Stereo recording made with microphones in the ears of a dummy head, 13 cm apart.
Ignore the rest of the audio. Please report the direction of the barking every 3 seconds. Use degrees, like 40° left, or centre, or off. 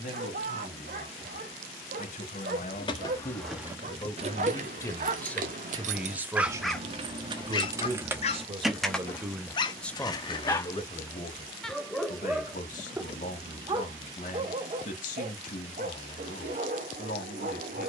60° right, 60° right, 20° left, 20° left, 20° right, 50° right.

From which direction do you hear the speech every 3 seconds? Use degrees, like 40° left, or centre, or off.
60° left, 30° left, 30° right, 20° left, 60° left, 60° left.